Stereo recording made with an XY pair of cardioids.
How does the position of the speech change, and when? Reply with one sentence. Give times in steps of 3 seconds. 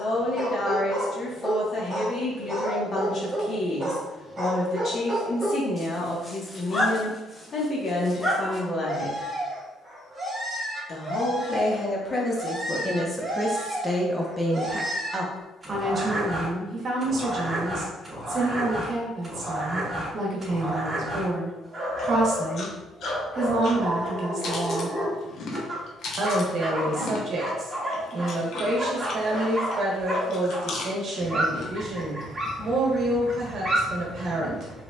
You can hear the speech on the left from 0 s, in the centre from 12 s and on the right from 15 s.